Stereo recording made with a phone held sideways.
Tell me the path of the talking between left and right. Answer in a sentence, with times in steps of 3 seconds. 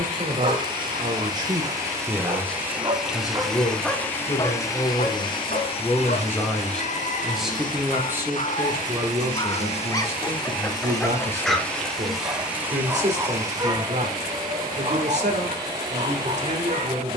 In this clip you hear the talking on the right from 0 s, on the left from 3 s, in the centre from 6 s and on the right from 9 s.